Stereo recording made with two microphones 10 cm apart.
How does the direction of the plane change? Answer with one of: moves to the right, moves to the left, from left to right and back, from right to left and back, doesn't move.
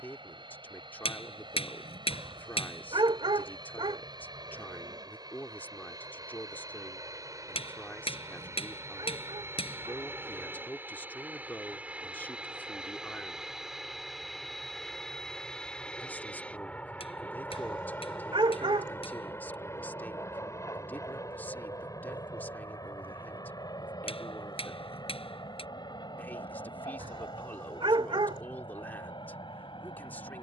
moves to the left.